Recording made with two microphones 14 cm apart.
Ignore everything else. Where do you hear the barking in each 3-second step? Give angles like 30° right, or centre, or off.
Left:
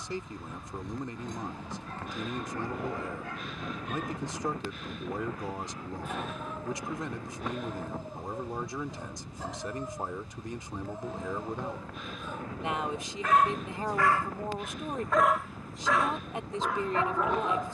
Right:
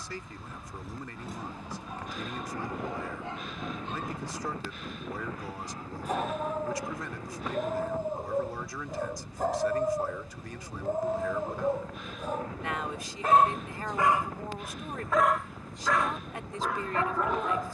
10° right, 30° right, 50° right, 60° right, 30° right, centre.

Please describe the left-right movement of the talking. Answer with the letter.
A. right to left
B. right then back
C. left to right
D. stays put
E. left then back
D.